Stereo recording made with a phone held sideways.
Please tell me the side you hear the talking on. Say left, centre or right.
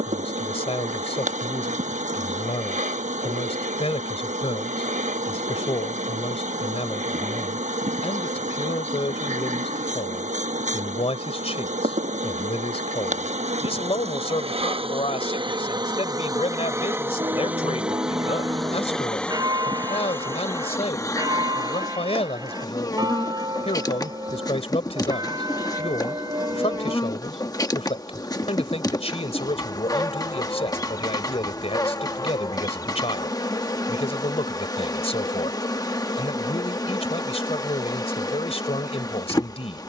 left.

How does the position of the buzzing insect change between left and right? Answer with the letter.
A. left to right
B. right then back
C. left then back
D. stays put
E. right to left
E.